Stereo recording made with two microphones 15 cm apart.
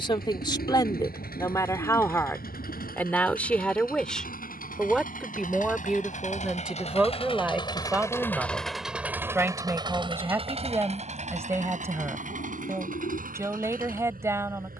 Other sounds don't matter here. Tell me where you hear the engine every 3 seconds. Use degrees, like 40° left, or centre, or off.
80° left, 70° left, 30° left, 40° right, 60° right.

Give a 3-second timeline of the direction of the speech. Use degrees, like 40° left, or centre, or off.
20° left, centre, 10° right, 20° right, 20° right.